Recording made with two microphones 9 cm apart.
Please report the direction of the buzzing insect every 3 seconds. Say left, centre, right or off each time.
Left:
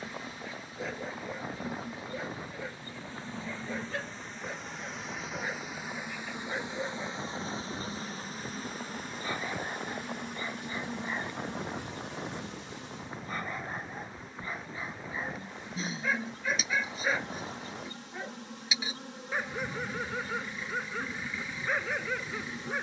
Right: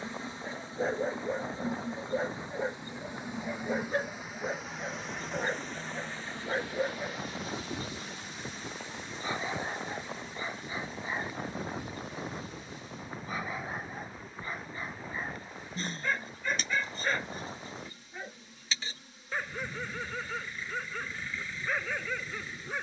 right, centre, left, left, left, left, left, left.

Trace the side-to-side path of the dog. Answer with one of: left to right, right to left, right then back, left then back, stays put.
right to left.